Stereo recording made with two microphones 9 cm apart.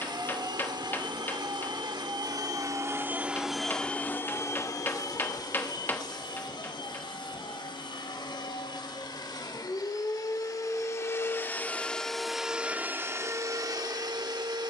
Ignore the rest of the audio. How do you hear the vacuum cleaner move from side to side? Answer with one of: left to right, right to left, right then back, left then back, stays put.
left then back.